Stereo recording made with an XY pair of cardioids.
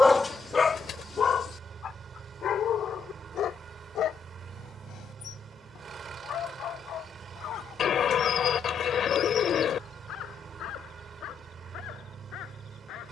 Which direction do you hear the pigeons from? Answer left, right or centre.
left.